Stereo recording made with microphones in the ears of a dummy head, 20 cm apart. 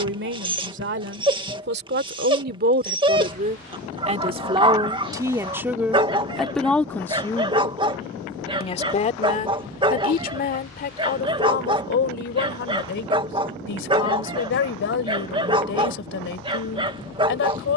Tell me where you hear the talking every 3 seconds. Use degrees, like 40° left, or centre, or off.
50° right, 20° right, 10° left, 40° left, 50° left, 60° left.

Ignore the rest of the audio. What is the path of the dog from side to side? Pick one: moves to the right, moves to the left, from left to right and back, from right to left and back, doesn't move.
doesn't move.